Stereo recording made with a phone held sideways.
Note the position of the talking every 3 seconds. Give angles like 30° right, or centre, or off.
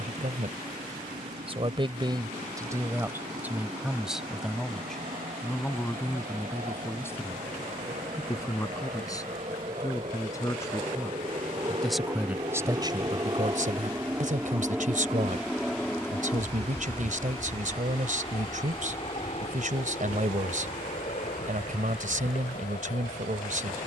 40° right, centre, 20° left, 20° left, 40° right, 60° right, 60° right, 60° right.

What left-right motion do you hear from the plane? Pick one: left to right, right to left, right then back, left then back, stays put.
right to left.